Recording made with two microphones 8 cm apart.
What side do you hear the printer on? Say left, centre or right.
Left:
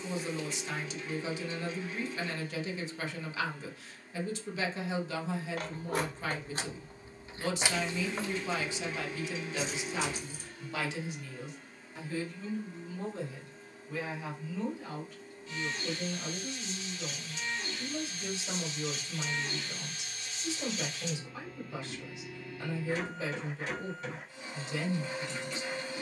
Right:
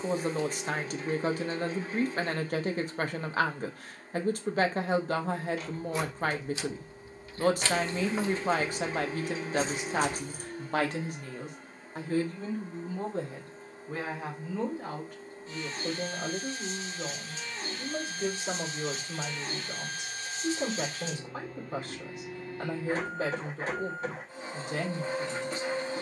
right.